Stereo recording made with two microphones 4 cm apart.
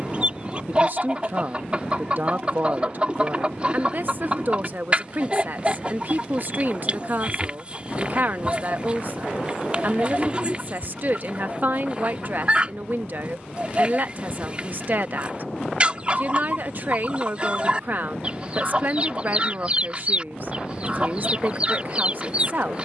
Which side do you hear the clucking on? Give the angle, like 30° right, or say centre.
30° right.